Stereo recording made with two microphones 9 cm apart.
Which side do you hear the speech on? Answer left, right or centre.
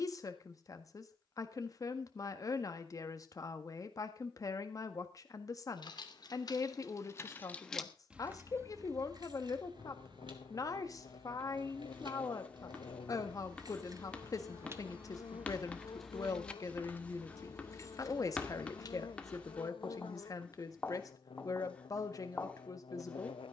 left.